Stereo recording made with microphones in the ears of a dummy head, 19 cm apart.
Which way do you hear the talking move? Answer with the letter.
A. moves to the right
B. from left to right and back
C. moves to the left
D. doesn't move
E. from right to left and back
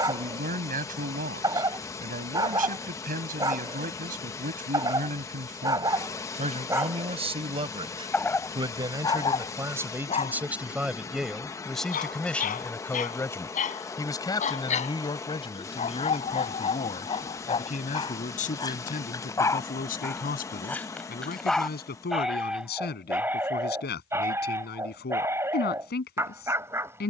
C.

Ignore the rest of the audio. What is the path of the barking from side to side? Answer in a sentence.
In this clip you hear the barking move from right to left and back again.